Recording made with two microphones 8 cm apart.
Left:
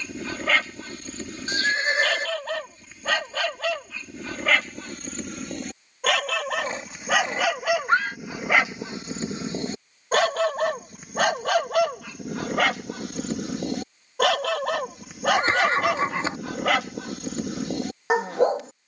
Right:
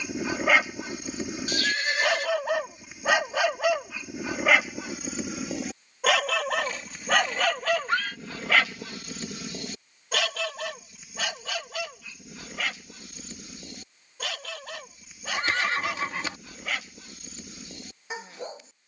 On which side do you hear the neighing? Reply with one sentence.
You can hear the neighing on the left.